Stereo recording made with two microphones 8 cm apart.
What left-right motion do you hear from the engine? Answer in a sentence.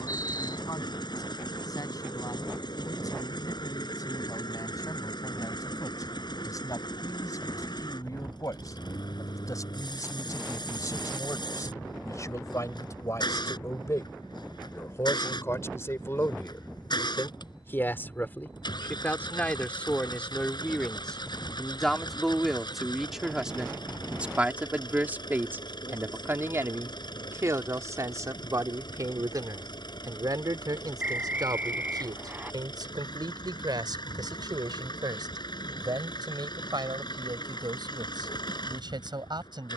You can hear the engine stay in one place.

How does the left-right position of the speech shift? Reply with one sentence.
In this clip you hear the speech travel towards the right.